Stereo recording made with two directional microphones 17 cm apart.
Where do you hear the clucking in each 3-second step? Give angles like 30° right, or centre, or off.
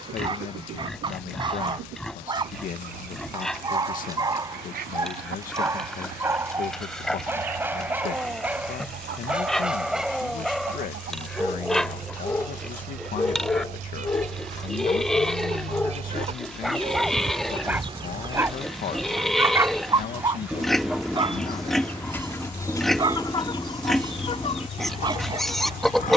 70° right, 60° right, 60° right, 60° right, 50° right, 40° right, 20° right, 20° left, 40° left.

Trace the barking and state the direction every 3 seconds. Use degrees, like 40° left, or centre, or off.
30° right, 20° right, 10° right, centre, 20° left, centre, 20° right, 30° right, 30° right.